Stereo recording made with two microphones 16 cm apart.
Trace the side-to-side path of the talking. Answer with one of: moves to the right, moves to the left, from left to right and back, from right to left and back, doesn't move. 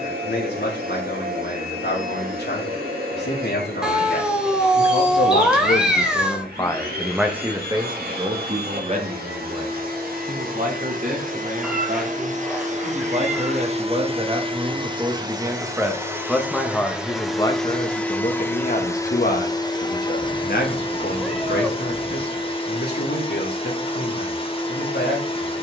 from left to right and back.